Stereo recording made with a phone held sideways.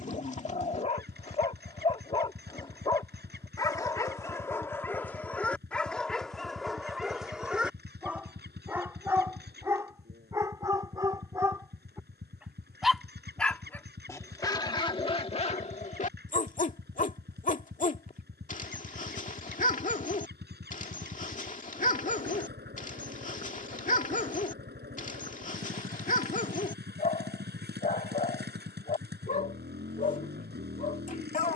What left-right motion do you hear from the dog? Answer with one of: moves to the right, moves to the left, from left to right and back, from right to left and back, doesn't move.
from left to right and back.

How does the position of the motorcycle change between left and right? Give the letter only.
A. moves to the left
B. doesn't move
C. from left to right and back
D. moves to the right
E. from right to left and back
B.